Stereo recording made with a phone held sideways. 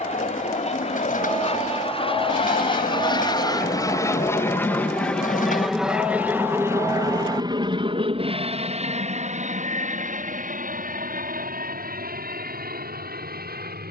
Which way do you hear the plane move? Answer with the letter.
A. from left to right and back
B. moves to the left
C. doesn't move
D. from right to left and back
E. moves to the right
E.